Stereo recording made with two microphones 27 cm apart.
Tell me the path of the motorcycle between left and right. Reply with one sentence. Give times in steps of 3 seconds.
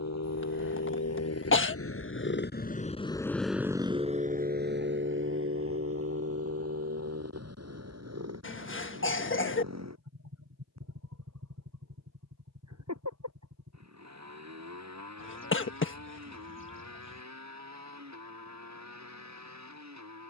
In this clip you hear the motorcycle on the left from 0 s and on the right from 3 s.